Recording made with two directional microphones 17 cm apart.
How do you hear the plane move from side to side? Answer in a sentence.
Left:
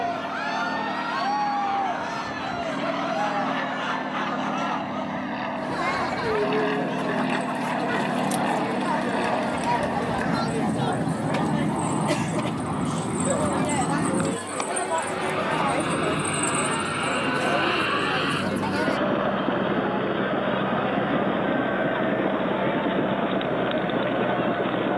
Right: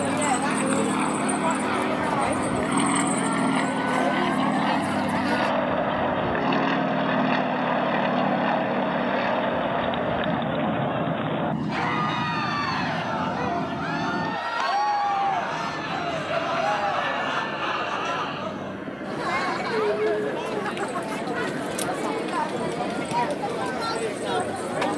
You can hear the plane go from the right side to the left.